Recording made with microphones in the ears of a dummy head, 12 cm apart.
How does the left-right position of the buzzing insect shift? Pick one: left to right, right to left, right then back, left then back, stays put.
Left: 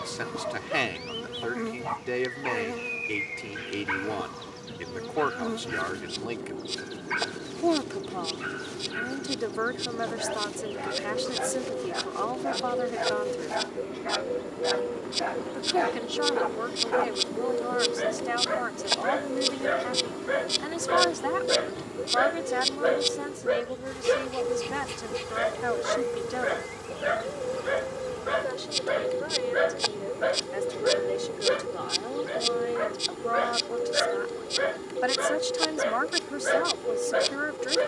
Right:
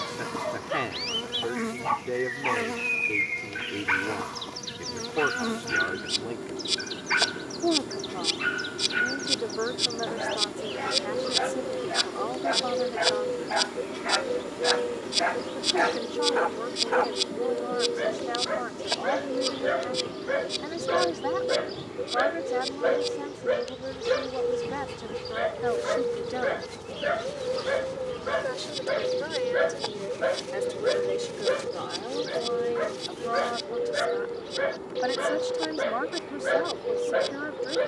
right to left.